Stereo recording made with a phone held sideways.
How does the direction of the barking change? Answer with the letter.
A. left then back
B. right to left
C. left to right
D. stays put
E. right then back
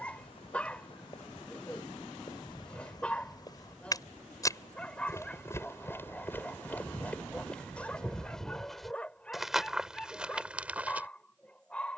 D.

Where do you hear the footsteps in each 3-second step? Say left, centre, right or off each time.
left, left, centre, centre.